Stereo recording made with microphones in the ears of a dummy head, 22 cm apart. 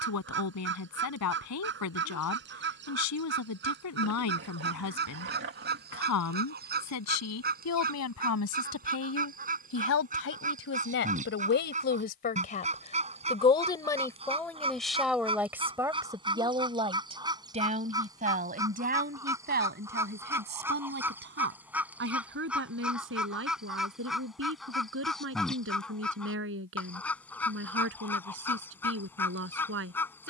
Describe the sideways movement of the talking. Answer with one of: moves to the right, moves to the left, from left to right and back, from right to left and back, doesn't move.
moves to the right.